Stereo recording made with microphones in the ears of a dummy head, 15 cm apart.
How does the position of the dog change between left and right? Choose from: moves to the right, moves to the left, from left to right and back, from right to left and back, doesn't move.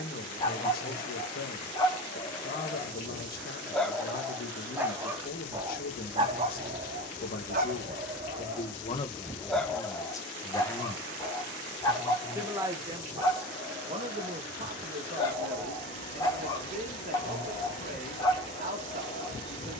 from left to right and back.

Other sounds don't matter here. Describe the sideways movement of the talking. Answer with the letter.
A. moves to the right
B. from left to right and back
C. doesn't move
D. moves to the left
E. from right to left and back
A.